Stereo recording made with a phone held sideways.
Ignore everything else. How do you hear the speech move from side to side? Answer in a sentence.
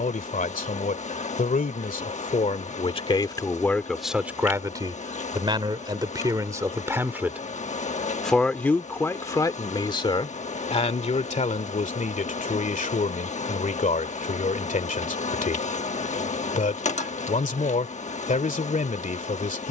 You can hear the speech go right and come back.